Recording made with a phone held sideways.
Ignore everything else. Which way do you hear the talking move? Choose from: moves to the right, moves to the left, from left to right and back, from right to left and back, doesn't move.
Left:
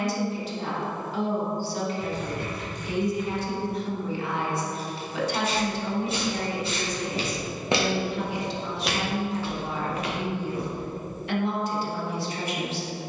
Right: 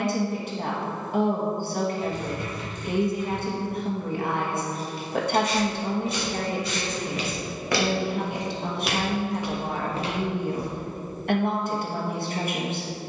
doesn't move.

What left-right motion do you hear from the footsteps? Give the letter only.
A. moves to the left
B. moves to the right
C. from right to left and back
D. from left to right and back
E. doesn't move
B.